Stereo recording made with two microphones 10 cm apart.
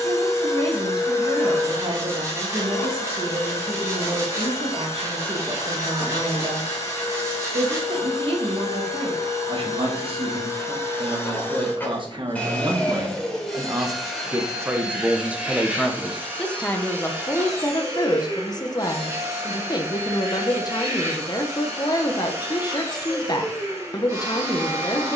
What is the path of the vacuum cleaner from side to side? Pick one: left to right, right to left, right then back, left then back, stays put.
left to right.